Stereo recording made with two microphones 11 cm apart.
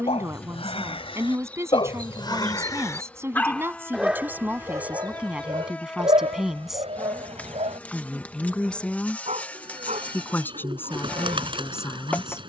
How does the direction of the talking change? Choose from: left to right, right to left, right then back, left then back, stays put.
right to left.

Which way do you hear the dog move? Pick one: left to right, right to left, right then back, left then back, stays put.
left to right.